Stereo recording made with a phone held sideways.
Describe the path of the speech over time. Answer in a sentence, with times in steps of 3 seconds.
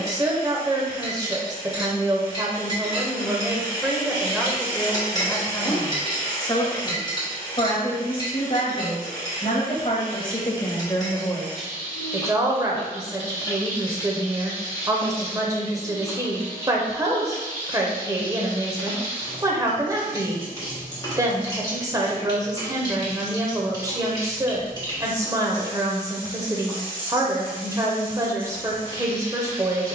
You can hear the speech on the right from 0 s, in the centre from 3 s, on the left from 6 s and on the right from 12 s.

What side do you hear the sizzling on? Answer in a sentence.
You can hear the sizzling on the left.